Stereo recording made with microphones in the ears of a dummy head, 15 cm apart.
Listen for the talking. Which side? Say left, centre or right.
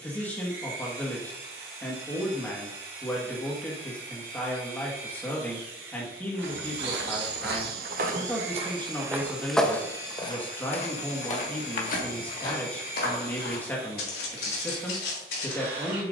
centre.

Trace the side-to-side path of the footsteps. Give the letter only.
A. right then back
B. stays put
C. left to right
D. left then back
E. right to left
E.